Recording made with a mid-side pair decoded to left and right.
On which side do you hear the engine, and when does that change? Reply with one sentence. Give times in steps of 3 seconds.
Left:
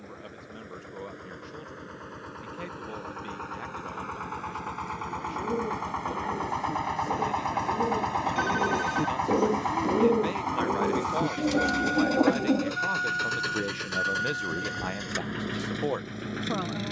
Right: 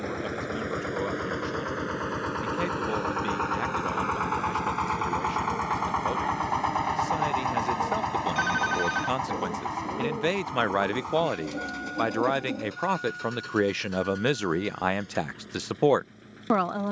In this clip you hear the engine on the right from 0 s, in the centre from 6 s and on the left from 9 s.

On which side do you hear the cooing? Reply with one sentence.
In this clip you hear the cooing on the left.